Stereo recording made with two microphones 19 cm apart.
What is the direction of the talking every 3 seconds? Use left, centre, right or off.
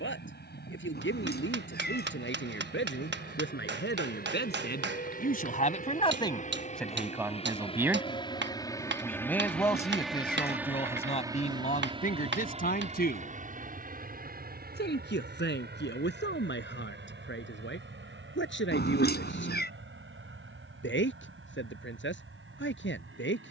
left, left, centre, left, left, left, left, left.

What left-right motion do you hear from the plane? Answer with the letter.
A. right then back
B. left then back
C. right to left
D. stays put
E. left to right
E.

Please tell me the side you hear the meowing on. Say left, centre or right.
left.